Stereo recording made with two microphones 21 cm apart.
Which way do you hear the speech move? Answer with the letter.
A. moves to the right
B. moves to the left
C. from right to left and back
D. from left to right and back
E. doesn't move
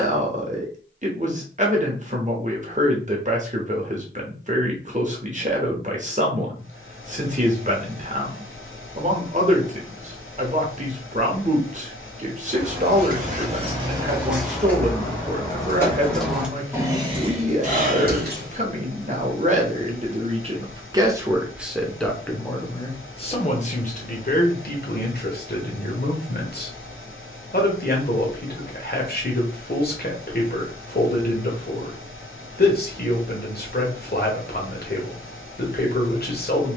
B.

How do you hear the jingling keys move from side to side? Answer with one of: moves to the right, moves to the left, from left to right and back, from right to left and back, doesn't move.
from right to left and back.